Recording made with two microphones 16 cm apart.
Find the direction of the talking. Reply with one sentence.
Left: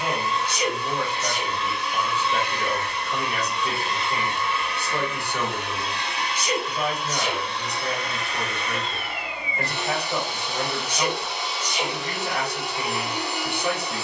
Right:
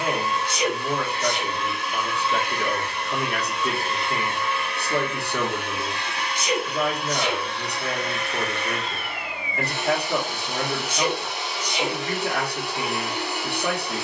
You can hear the talking on the right.